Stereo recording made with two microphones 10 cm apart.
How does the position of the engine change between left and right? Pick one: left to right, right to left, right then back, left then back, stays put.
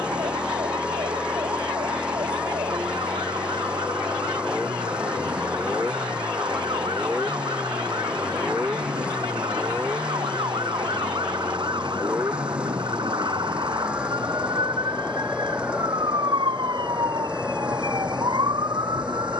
stays put.